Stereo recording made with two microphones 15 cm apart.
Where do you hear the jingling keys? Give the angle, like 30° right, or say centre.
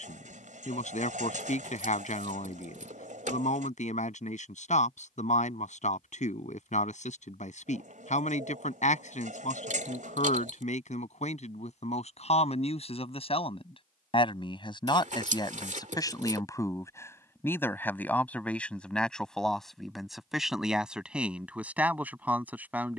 60° right.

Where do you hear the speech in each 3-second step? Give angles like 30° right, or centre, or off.
60° left, 60° left, 60° left, 50° left, 40° left, 20° left, centre, 10° right.